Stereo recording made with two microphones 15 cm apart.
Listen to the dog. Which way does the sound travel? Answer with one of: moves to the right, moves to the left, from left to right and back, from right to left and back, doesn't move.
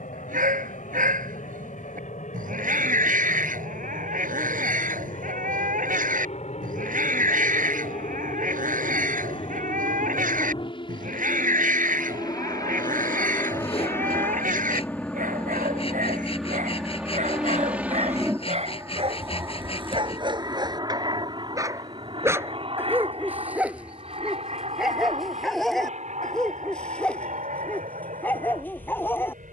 moves to the left.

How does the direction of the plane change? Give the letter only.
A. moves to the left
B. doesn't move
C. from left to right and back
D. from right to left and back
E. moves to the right
E.